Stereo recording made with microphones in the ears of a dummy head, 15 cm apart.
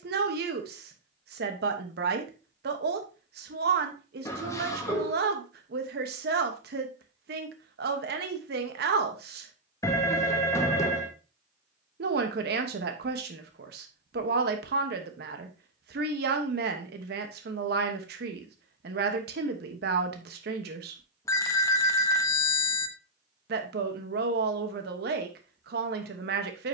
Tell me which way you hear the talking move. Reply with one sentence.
You can hear the talking stay in one place.